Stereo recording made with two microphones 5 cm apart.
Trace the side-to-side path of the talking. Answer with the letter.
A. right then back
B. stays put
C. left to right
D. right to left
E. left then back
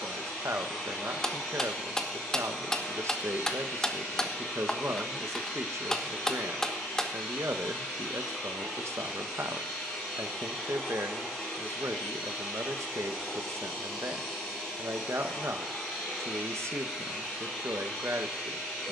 B.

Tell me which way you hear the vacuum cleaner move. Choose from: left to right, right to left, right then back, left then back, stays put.
stays put.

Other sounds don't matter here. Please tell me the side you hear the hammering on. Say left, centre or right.
centre.